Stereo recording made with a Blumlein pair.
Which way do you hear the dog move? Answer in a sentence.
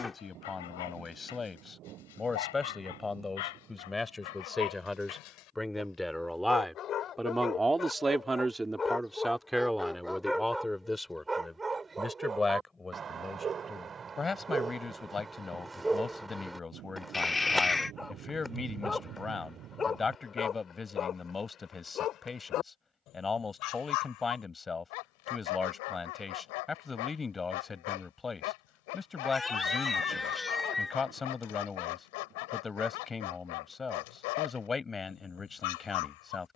In this clip you hear the dog move from left to right and back again.